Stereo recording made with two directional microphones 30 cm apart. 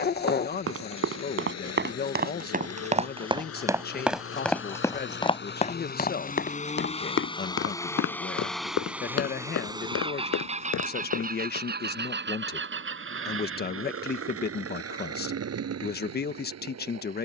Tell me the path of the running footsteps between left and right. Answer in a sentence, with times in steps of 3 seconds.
In this clip you hear the running footsteps on the right from 0 s, in the centre from 3 s, on the left from 6 s and not at all from 12 s.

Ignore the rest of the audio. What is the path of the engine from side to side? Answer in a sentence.
In this clip you hear the engine go from the left side to the right.